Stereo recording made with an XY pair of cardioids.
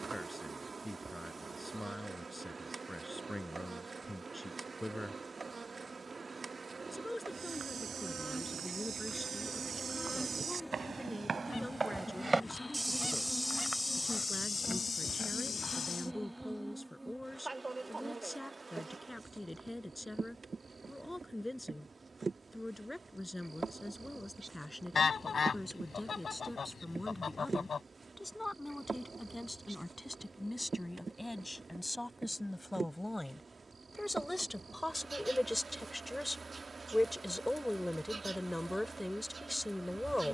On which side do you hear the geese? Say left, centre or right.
left.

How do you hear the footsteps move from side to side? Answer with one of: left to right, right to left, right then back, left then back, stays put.
right to left.